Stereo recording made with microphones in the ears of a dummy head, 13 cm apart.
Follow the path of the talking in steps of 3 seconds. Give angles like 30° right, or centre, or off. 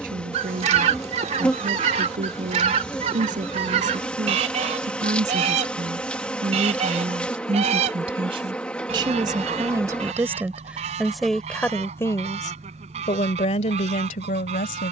60° right, 50° right, 40° right, 10° right, 50° left.